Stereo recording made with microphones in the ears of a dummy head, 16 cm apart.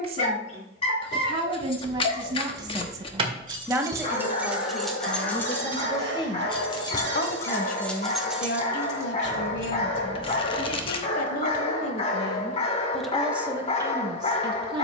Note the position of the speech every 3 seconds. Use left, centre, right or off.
right, centre, left, left, centre.